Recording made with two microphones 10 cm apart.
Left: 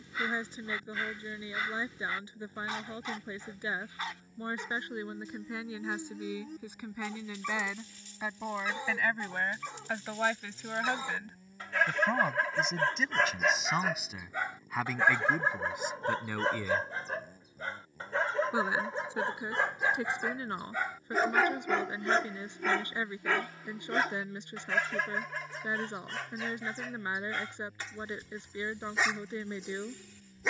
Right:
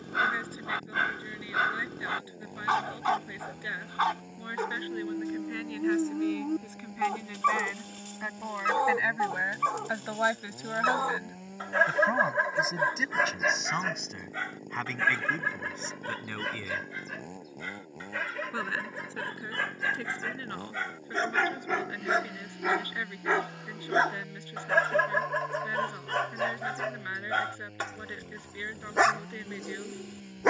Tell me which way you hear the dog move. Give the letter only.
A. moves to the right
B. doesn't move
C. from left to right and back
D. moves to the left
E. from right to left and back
E.